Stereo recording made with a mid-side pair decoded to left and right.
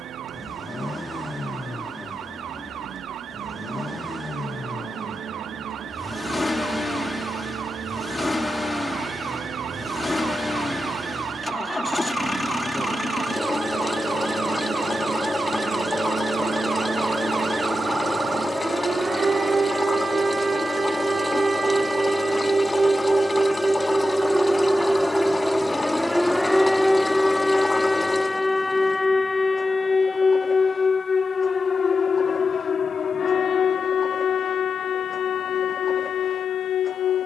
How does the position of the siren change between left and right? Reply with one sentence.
You can hear the siren move to the left.